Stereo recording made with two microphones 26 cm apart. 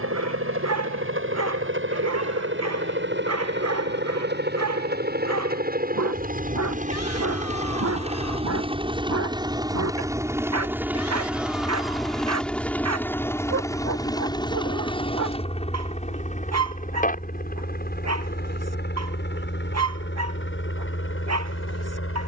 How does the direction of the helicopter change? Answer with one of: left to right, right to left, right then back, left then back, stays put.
right to left.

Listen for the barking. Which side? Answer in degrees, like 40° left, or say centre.
70° right.